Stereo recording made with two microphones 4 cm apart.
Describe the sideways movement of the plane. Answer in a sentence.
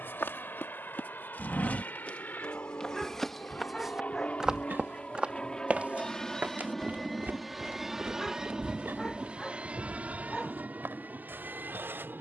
In this clip you hear the plane go from the left side to the right.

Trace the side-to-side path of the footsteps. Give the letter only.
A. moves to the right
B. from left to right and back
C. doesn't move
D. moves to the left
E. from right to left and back
A.